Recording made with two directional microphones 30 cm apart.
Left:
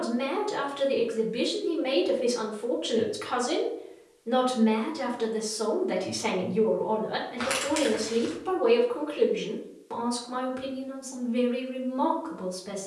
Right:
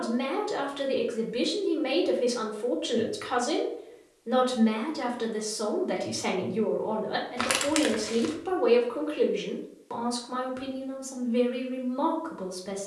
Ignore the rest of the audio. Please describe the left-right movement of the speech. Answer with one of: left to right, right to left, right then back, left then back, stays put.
stays put.